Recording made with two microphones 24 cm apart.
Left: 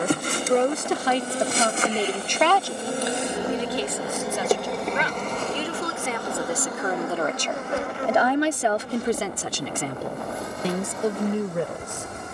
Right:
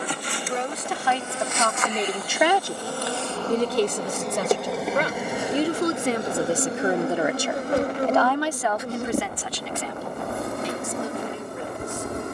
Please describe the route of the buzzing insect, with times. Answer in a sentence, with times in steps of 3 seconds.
In this clip you hear the buzzing insect on the left from 0 s, in the centre from 3 s and on the right from 6 s.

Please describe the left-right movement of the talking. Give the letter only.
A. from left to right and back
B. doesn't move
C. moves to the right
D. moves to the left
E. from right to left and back
A.